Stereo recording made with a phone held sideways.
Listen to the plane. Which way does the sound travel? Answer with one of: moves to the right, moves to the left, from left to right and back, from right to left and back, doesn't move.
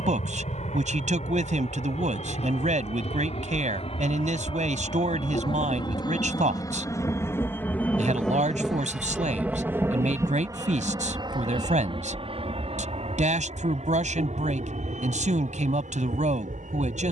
moves to the right.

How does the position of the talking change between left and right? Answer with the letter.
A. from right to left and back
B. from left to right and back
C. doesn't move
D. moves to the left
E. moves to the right
C.